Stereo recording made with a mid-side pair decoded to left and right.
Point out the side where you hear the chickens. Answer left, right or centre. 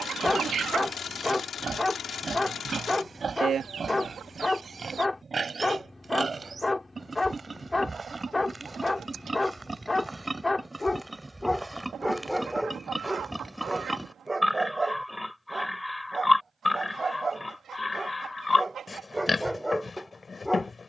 right.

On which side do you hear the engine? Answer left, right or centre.
left.